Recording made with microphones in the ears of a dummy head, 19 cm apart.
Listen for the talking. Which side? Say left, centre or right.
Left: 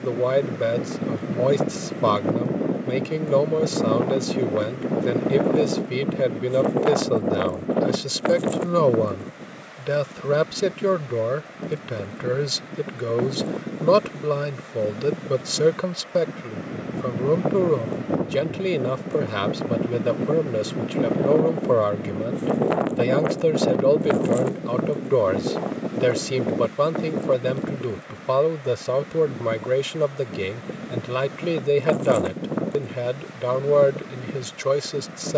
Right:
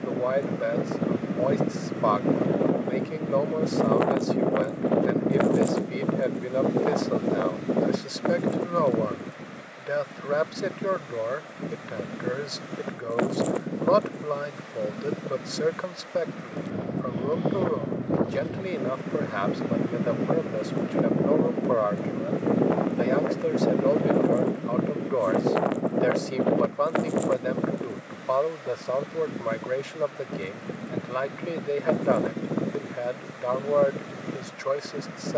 left.